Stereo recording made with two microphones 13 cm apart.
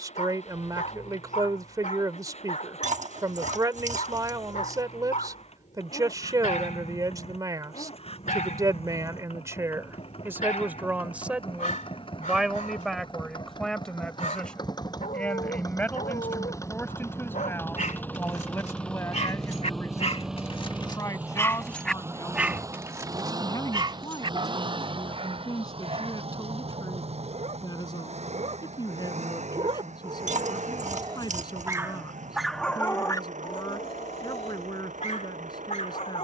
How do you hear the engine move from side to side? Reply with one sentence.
In this clip you hear the engine travel towards the right.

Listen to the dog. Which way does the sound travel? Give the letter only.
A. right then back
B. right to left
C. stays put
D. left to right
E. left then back
A.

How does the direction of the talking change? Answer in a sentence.
In this clip you hear the talking move to the left.